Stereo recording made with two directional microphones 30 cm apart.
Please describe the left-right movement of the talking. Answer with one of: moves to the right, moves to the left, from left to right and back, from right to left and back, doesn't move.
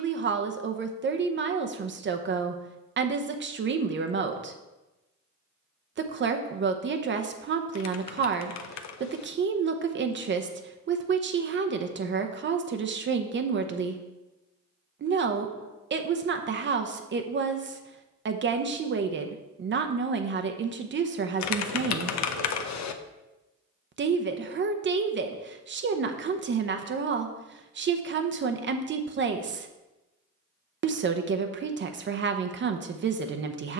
doesn't move.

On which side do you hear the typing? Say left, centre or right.
left.